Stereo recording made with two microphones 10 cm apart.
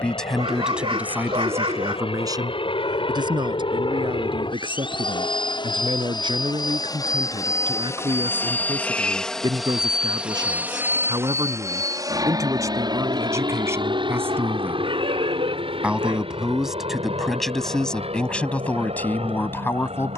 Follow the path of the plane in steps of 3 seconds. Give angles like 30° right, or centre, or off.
70° left, 60° left, 30° left, 10° right, 40° right, 60° right, 60° right.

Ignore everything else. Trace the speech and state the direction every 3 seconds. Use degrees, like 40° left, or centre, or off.
20° right, 50° right, 50° right, 40° right, 30° right, centre, 20° left.